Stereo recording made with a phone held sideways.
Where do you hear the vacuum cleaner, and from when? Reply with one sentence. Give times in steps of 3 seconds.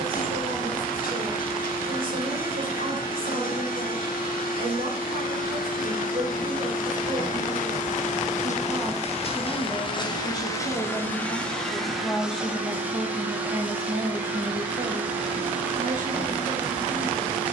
You can hear the vacuum cleaner on the left from 0 s and in the centre from 12 s.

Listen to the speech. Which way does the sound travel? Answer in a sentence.
You can hear the speech go left and come back.